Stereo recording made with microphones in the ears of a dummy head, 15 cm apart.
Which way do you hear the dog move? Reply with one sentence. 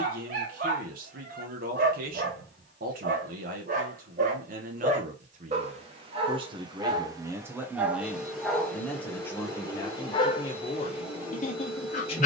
You can hear the dog travel towards the left.